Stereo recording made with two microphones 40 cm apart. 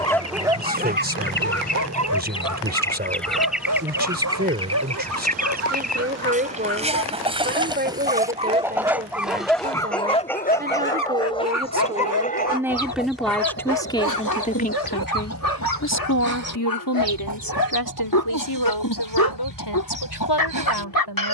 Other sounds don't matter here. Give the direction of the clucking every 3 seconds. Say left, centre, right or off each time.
left, centre, centre, centre, left, left, left.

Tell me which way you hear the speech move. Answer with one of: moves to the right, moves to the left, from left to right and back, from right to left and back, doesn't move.
moves to the left.